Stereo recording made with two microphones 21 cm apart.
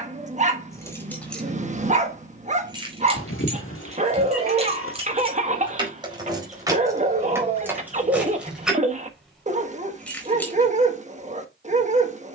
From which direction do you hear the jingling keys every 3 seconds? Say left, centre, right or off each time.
centre, right, centre, centre.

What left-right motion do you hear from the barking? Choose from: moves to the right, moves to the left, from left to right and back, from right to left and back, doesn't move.
doesn't move.